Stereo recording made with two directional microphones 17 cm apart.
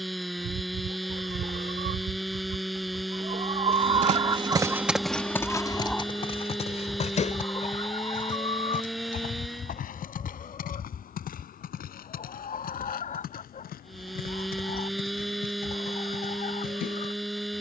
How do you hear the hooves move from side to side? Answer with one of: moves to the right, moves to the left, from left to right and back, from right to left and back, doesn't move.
moves to the left.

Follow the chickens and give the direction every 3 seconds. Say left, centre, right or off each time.
right, right, left, left, left, left.